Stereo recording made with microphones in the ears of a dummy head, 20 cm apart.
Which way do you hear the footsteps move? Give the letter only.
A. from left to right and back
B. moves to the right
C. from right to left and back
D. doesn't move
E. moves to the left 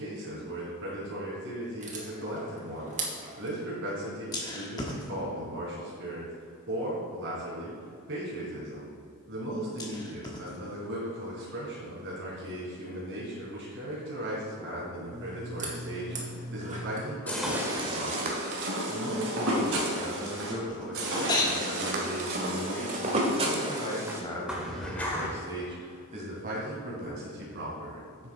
A.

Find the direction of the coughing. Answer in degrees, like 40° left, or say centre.
20° left.